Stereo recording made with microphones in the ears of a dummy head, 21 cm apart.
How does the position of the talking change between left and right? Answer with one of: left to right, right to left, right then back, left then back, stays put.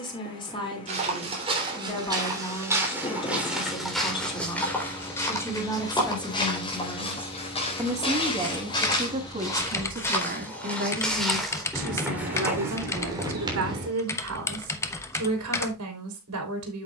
left to right.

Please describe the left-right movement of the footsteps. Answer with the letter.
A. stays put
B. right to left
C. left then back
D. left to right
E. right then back
C.